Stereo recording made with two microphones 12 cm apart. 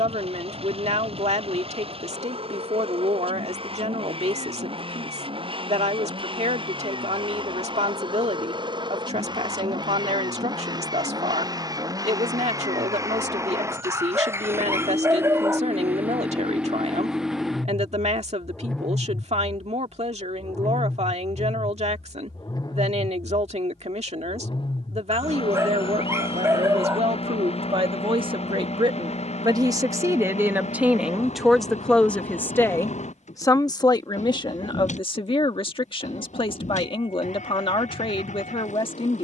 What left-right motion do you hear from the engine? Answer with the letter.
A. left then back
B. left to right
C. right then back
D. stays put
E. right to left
E.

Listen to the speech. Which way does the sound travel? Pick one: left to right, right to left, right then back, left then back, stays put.
right to left.